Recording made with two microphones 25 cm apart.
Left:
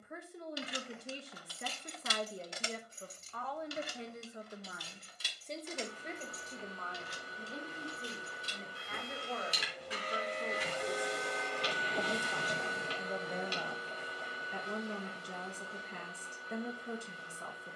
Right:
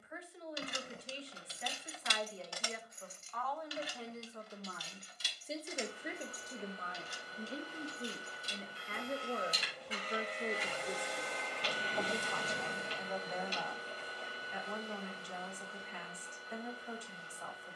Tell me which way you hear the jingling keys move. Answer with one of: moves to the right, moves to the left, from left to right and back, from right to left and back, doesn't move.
moves to the left.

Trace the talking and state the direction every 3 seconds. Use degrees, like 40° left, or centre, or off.
50° left, 10° left, 30° right, 20° right, 30° left, 50° left.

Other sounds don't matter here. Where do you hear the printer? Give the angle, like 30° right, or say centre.
70° left.